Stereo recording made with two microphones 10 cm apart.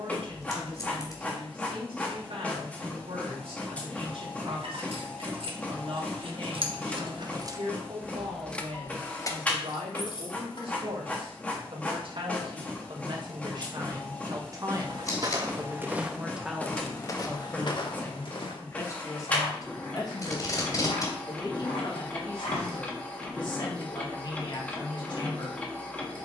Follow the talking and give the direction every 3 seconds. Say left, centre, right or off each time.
right, right, right, right, right, centre, left, left, left.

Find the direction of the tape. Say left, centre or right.
left.